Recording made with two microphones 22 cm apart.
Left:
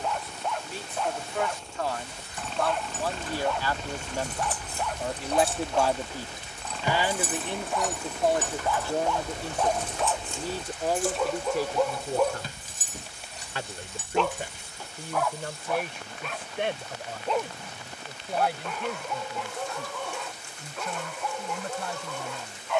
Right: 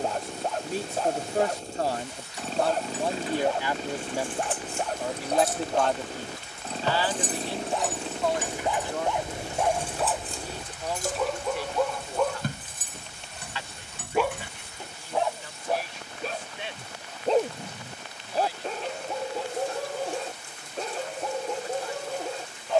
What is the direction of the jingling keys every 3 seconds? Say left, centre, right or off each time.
left, left, centre, right, right, off, off, off.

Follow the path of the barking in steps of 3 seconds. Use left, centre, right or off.
right, right, right, centre, centre, right, right, right.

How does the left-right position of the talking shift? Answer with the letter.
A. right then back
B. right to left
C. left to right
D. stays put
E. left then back
B.